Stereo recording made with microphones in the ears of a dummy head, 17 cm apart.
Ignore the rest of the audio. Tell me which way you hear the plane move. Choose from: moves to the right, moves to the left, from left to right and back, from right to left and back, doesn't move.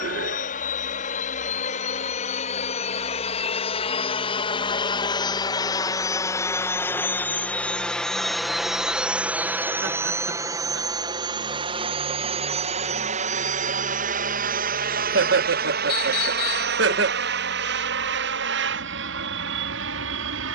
moves to the right.